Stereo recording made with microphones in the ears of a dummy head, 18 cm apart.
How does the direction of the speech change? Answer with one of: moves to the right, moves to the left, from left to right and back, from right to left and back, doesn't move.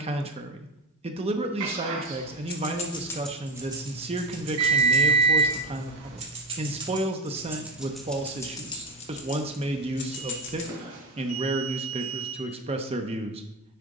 doesn't move.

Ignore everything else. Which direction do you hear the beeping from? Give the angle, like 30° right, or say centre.
70° right.